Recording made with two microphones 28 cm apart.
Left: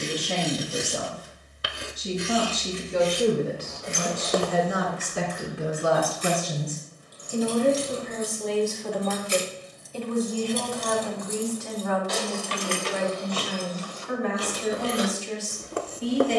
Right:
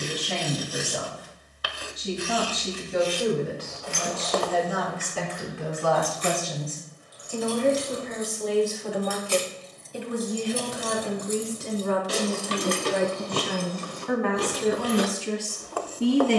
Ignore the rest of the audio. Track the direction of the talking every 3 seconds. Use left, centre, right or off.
left, left, centre, right, right, right.